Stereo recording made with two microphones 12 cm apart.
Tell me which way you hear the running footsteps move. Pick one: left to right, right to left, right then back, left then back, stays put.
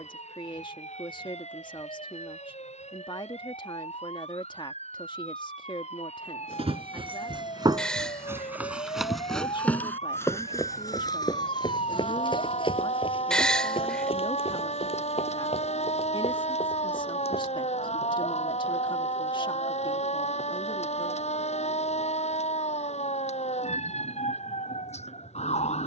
right to left.